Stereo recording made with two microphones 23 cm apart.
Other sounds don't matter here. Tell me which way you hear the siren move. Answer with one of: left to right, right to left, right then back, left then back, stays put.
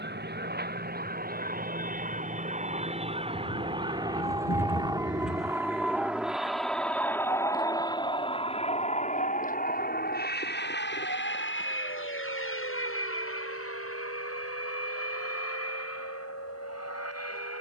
right to left.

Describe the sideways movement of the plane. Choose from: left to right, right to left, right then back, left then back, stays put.
right to left.